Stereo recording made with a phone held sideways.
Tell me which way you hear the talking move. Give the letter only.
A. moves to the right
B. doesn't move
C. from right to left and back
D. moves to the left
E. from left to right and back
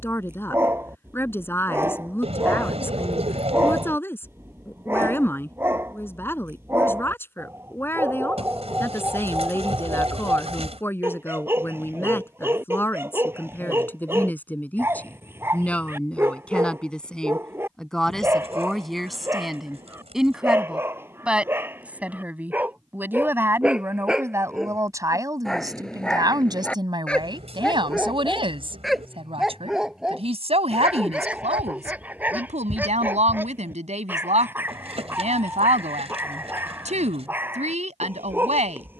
A.